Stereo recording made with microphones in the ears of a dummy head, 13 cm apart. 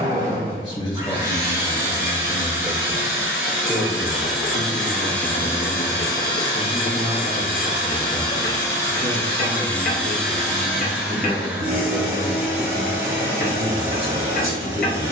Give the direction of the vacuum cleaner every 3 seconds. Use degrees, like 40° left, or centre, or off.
20° right, centre, 30° left, centre, 20° right.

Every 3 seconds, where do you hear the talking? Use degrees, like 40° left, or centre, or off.
30° left, 20° left, 20° right, 40° right, 40° right.